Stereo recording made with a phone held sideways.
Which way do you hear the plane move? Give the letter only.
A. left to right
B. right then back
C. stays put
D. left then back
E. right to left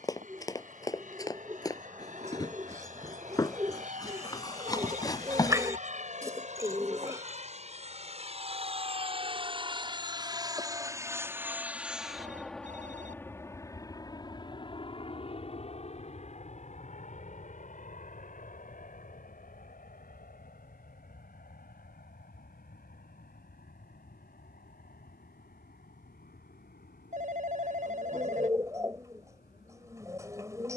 E.